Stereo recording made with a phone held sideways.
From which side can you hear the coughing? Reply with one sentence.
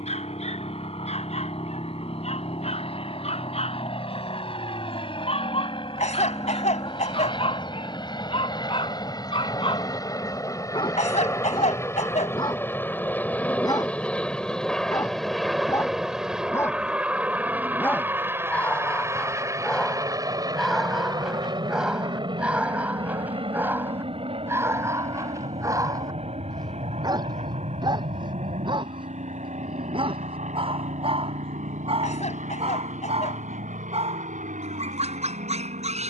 In this clip you hear the coughing on the left.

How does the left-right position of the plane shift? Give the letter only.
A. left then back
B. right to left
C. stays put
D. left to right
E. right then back
D.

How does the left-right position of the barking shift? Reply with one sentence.
You can hear the barking move from left to right.